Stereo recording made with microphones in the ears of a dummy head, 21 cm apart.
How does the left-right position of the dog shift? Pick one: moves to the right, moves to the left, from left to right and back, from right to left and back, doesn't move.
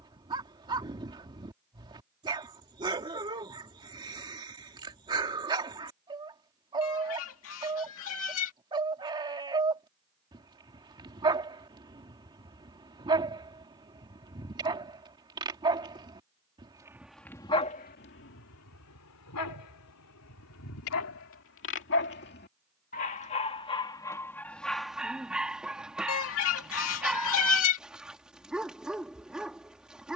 from right to left and back.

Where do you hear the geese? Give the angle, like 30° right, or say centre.
60° left.